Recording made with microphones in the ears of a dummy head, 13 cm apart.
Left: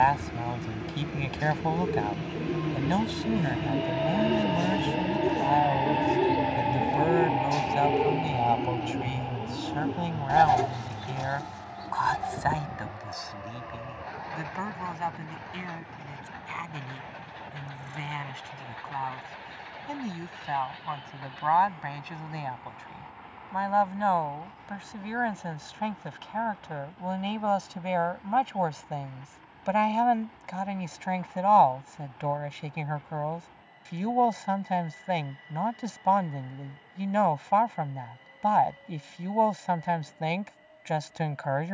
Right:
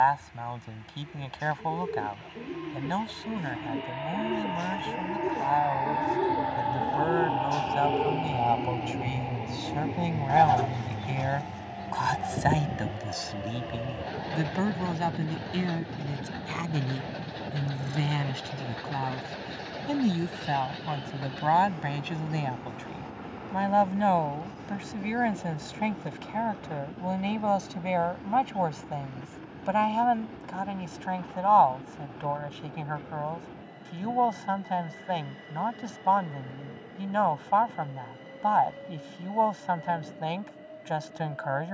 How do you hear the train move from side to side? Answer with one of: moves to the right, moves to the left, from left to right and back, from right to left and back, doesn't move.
moves to the right.